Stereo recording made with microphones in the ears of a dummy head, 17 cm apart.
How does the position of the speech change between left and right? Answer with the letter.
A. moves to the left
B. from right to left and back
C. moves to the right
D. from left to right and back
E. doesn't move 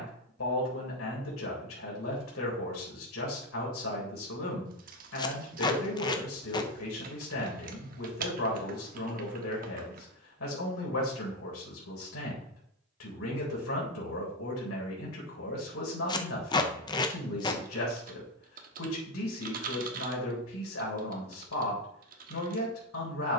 E.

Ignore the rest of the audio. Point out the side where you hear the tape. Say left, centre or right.
left.